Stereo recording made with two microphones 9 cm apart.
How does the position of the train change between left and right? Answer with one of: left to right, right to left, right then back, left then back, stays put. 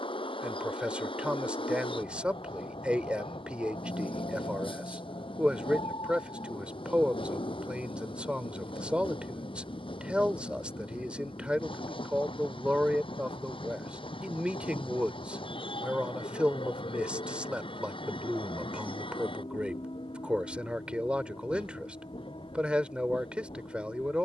stays put.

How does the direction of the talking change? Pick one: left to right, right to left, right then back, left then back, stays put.
stays put.